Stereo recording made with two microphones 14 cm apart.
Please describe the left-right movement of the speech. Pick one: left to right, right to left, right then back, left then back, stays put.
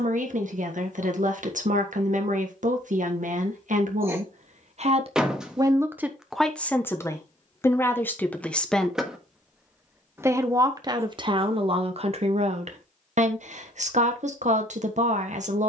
left then back.